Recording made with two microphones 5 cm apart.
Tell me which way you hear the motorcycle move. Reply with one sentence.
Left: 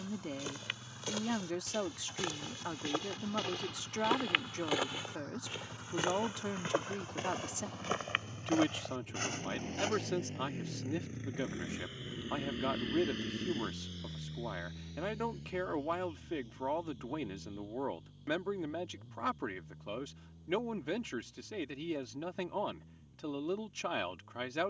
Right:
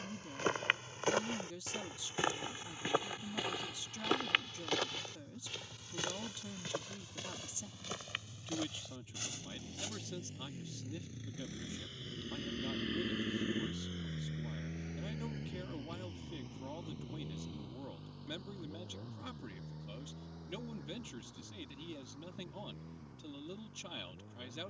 You can hear the motorcycle go from the left side to the right.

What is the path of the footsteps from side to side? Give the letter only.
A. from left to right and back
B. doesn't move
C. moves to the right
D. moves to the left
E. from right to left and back
D.